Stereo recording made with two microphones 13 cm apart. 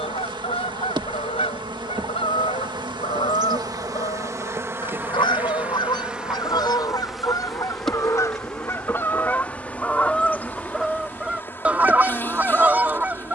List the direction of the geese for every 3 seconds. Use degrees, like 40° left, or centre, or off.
50° left, 40° left, 30° left, centre, 10° right.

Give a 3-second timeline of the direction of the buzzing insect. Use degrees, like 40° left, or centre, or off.
40° right, 20° right, centre, 10° left, 20° left.